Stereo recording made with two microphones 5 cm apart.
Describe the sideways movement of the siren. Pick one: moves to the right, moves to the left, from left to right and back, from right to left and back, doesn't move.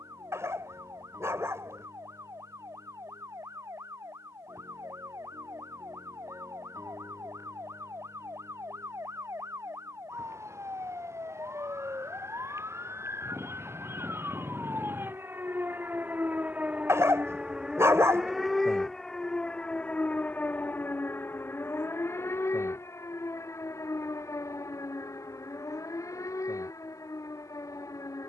moves to the left.